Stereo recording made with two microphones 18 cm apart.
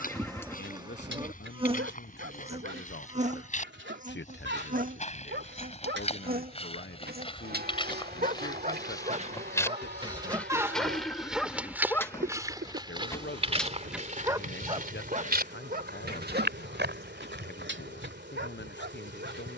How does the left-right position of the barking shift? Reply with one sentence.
In this clip you hear the barking go left and come back.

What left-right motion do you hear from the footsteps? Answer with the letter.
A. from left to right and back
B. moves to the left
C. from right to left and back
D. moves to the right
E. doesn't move
D.